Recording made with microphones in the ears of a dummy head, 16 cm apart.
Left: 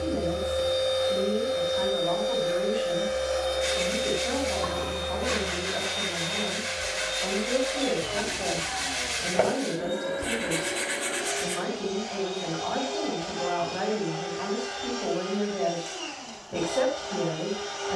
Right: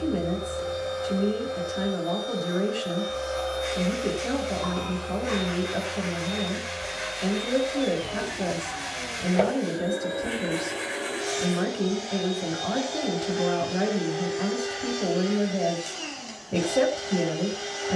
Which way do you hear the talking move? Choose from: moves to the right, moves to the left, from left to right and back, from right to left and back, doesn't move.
doesn't move.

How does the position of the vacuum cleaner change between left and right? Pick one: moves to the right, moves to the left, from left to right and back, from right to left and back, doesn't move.
moves to the right.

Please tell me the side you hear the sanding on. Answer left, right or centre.
left.